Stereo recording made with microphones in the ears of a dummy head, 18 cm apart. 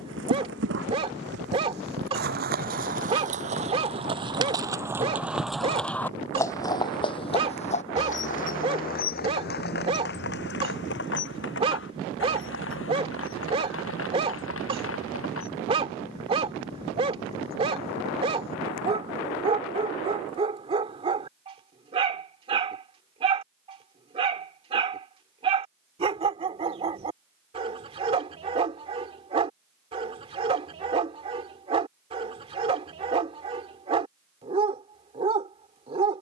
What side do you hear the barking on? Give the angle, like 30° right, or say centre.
30° right.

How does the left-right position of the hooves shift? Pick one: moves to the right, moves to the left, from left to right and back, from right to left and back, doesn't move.
moves to the left.